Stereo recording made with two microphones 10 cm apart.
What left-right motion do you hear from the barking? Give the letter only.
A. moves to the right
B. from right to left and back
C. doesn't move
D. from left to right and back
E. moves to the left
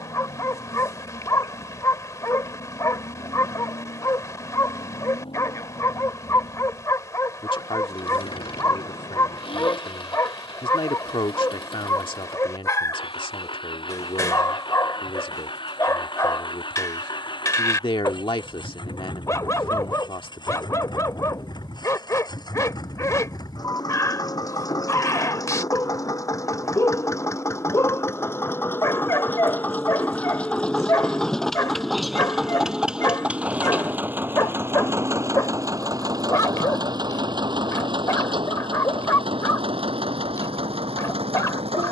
C.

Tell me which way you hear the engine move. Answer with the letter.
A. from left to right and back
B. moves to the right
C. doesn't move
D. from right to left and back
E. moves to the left
B.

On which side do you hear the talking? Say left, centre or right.
left.